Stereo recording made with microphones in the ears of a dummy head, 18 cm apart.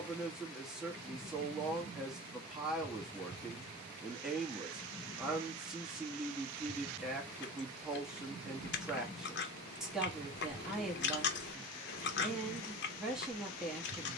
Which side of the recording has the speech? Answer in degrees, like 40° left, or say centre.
centre.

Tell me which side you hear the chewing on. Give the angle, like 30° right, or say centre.
60° left.